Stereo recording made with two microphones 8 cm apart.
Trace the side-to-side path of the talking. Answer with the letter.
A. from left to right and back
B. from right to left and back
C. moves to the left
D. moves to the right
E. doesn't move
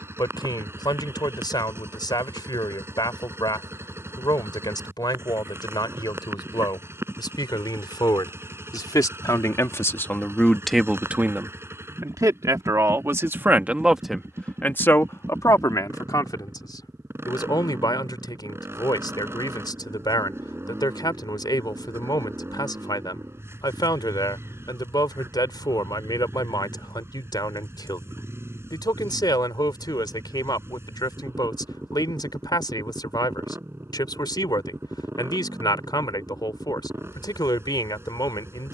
A.